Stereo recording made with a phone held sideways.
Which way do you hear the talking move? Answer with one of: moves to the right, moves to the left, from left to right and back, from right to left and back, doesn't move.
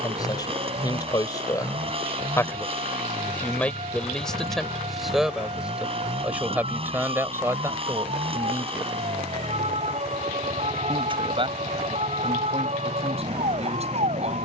moves to the right.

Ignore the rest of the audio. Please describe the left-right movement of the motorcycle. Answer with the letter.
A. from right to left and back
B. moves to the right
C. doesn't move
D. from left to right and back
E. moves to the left
C.